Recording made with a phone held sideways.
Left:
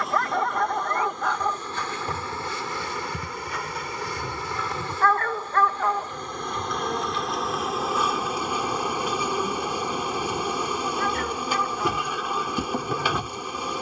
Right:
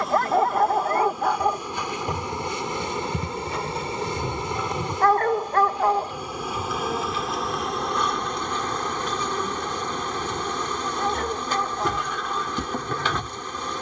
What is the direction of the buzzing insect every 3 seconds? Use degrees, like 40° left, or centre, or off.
10° right, 20° right, centre, 10° left, 10° left.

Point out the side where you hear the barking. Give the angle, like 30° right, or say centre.
30° right.